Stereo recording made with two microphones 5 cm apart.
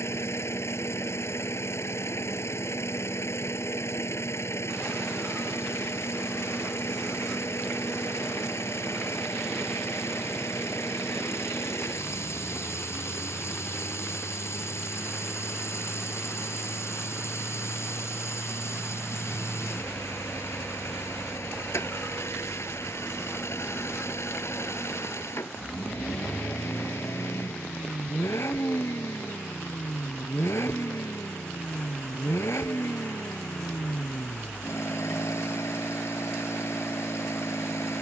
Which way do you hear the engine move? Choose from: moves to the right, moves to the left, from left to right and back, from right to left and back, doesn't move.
doesn't move.